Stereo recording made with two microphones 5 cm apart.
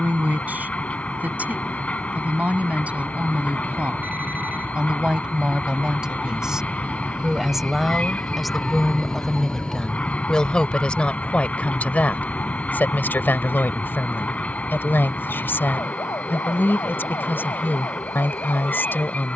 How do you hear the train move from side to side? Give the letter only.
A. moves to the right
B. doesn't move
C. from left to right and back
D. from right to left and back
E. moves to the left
B.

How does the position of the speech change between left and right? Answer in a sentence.
In this clip you hear the speech travel towards the left.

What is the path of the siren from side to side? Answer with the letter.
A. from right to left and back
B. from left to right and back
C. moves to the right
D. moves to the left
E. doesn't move
D.